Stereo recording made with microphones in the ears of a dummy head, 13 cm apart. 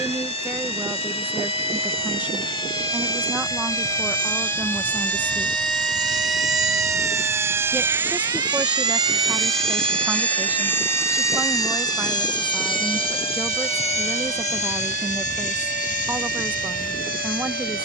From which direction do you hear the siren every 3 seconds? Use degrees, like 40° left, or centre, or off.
40° left, 20° left, 10° right, 40° right, 60° right, 70° right.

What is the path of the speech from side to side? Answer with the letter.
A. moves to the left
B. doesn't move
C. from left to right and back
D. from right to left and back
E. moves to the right
B.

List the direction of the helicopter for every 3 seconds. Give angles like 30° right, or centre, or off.
50° right, 40° right, 20° right, 10° left, 40° left, 60° left.